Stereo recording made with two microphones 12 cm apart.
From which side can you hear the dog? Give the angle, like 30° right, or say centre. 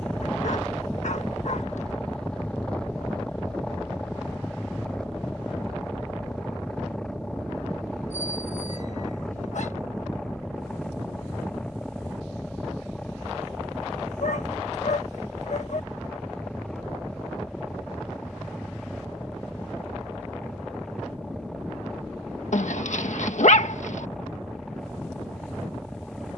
70° left.